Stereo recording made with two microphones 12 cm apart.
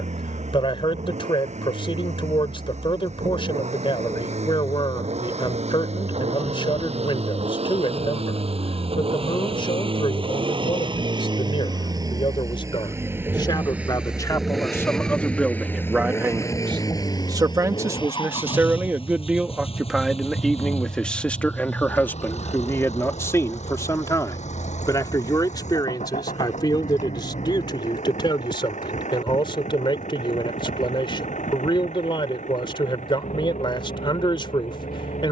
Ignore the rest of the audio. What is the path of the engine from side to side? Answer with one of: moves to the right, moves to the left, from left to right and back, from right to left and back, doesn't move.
moves to the left.